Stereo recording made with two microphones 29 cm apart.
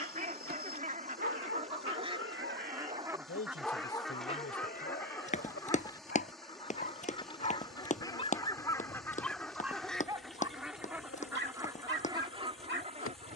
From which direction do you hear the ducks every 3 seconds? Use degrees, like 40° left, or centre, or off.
20° right, centre, 10° left, centre, 20° right.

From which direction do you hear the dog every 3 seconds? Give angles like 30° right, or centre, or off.
40° right, 20° left, 30° left, 20° right, 40° right.